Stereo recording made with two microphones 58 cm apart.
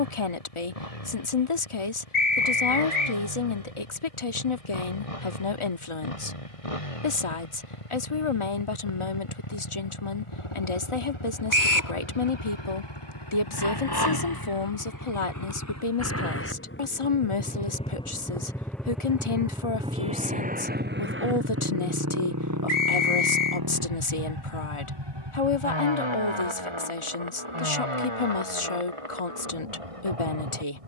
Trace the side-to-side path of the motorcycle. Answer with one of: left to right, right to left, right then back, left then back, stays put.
left to right.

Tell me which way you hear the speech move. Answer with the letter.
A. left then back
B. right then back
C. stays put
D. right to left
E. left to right
C.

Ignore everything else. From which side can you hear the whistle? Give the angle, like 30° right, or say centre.
30° left.